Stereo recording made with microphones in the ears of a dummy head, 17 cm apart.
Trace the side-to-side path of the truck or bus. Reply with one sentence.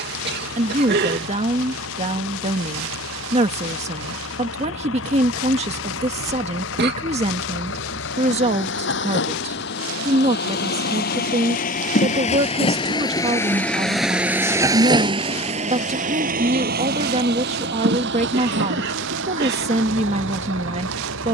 You can hear the truck or bus go from the left side to the right.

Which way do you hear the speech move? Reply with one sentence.
You can hear the speech stay put.